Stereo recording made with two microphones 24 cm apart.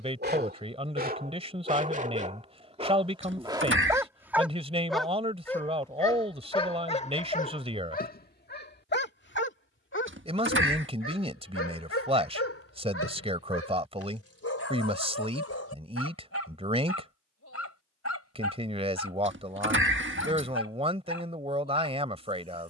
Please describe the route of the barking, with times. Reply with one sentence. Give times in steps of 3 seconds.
In this clip you hear the barking on the right from 0 s, in the centre from 3 s and on the left from 6 s.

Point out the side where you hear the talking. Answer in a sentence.
In this clip you hear the talking on the right.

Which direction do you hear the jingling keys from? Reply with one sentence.
In this clip you hear the jingling keys on the right.